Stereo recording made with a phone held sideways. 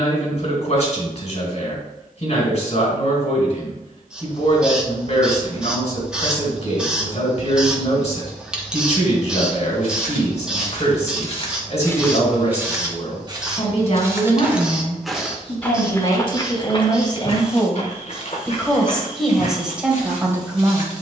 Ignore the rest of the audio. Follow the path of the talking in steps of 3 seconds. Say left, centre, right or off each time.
left, left, left, left, left, left, centre.